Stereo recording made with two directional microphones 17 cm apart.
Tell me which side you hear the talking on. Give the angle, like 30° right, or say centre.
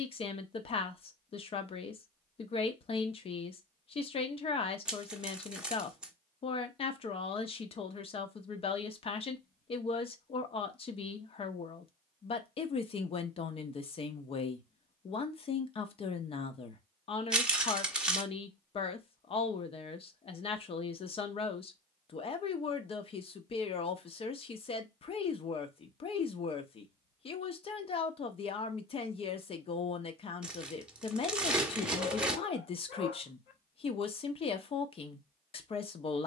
30° left.